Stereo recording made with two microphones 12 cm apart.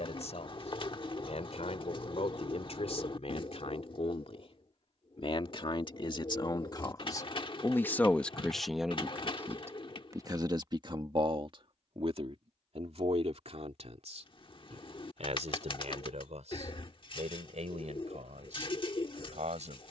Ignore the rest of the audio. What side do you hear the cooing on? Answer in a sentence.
In this clip you hear the cooing on the left.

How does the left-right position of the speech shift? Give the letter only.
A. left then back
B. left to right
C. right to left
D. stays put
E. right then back
B.